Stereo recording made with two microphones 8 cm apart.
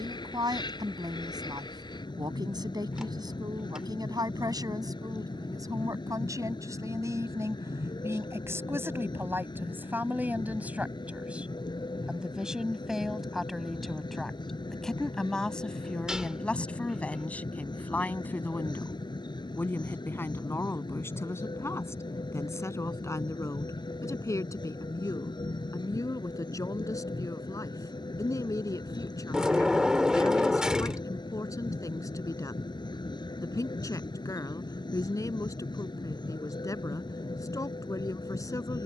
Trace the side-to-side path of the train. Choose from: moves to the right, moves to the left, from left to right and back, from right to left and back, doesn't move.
doesn't move.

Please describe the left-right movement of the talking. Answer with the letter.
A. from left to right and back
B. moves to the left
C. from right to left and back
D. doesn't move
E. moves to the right
B.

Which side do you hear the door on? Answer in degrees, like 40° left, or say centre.
10° right.